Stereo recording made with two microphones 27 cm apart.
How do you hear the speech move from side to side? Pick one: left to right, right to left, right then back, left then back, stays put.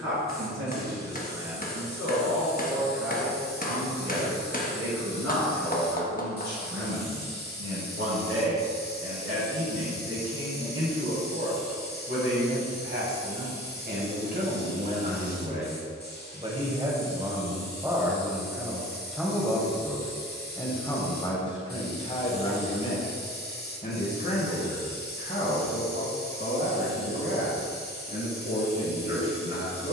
right to left.